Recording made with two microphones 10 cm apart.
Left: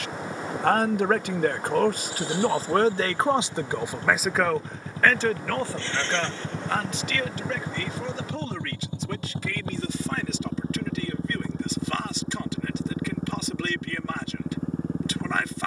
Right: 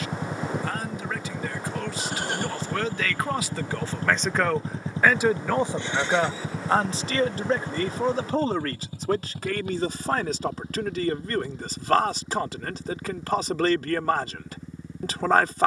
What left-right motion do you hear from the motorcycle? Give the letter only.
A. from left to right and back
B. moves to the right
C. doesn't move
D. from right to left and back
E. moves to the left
E.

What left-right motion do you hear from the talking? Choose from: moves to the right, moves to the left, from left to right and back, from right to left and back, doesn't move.
moves to the right.